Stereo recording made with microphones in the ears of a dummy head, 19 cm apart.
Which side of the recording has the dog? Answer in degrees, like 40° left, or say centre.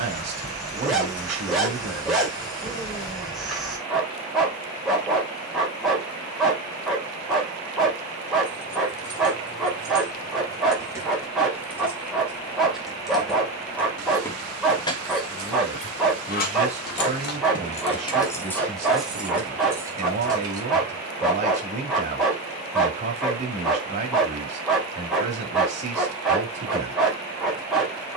centre.